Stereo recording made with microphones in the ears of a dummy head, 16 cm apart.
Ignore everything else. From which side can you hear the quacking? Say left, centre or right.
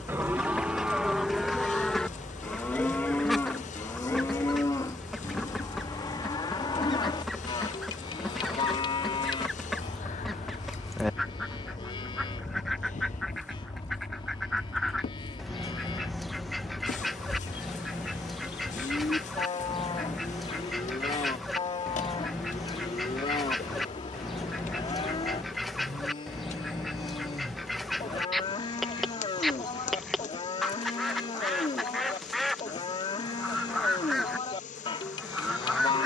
centre.